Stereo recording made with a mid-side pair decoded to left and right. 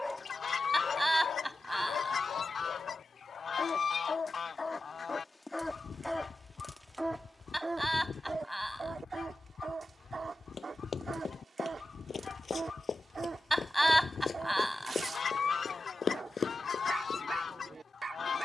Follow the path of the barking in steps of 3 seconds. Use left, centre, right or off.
left, left, centre, right, right, right.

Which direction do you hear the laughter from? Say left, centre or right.
centre.